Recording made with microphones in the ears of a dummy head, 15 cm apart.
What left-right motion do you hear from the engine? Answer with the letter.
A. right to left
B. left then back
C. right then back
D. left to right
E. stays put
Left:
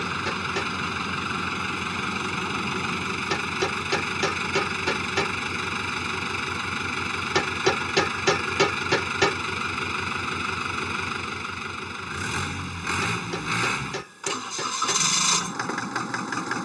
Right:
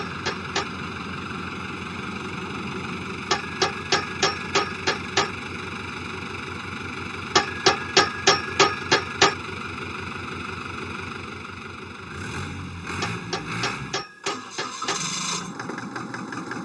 E.